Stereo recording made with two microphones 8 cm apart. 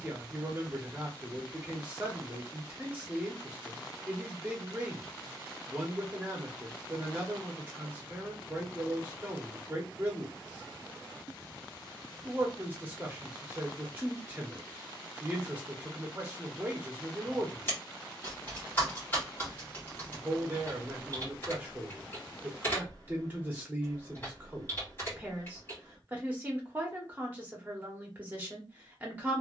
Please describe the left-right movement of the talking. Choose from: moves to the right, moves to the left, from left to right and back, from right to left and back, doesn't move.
doesn't move.